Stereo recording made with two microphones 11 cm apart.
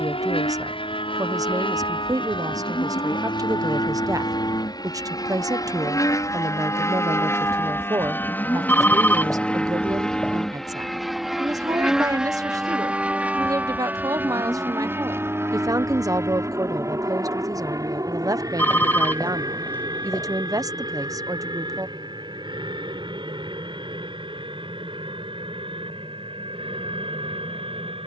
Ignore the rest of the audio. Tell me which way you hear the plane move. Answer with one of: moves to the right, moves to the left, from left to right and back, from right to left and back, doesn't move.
moves to the right.